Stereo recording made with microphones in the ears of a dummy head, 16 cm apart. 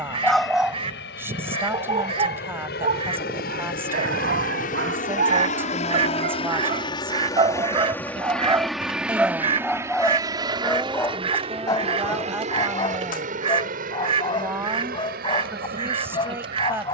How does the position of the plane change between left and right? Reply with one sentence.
You can hear the plane travel towards the right.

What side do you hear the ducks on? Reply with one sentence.
You can hear the ducks on the right.